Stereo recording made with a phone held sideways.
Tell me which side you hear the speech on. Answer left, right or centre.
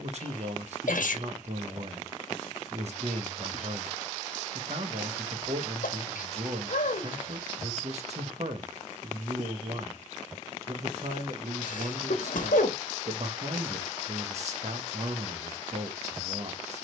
right.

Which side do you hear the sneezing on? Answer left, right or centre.
left.